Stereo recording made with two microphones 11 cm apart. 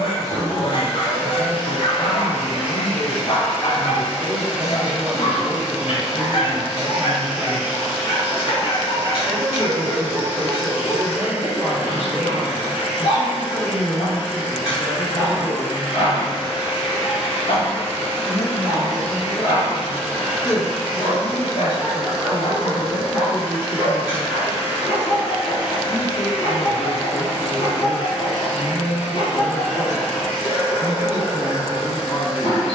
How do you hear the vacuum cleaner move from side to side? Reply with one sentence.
In this clip you hear the vacuum cleaner stay put.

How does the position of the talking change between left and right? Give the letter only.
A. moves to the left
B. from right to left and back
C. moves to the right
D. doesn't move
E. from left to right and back
A.